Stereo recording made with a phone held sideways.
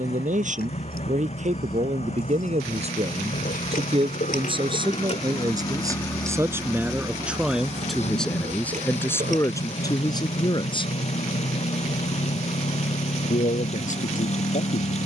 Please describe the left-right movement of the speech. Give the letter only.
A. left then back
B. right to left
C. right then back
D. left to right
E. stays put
B.